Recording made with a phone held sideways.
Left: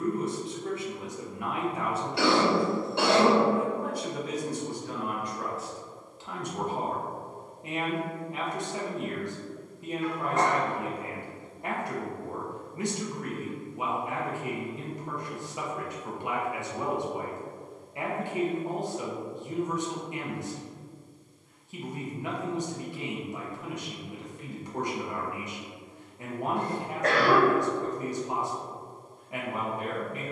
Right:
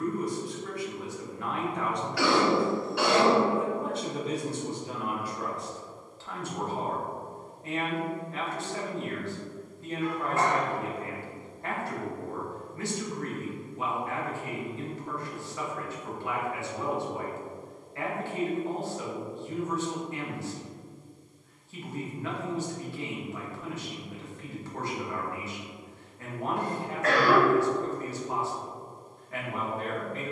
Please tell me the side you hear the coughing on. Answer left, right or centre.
left.